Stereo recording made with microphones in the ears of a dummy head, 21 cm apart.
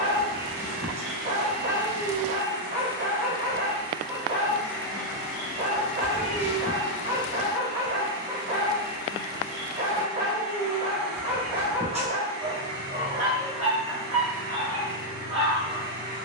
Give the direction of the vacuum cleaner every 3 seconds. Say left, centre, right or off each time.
left, centre, right, right, right, right.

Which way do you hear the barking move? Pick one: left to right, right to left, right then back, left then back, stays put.
stays put.